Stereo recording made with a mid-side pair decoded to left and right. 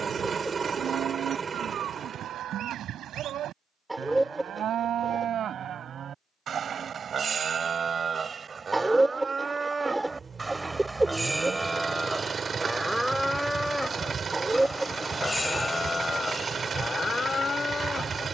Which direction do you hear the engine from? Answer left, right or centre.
right.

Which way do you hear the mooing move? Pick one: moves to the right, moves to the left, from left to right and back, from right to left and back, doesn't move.
moves to the left.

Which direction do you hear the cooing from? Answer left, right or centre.
centre.